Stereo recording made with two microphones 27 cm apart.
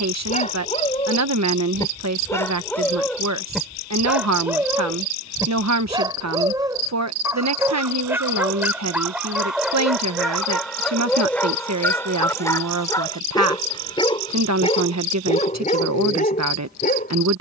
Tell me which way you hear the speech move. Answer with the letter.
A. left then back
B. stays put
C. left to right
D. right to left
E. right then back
B.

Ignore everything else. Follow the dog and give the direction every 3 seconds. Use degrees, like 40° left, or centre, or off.
20° left, 10° right, 10° right, centre, 20° left, 30° left.